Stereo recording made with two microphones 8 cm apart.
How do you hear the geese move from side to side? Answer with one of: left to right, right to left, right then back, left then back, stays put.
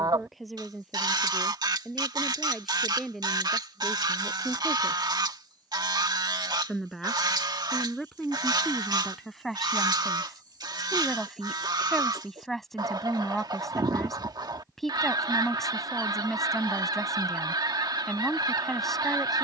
stays put.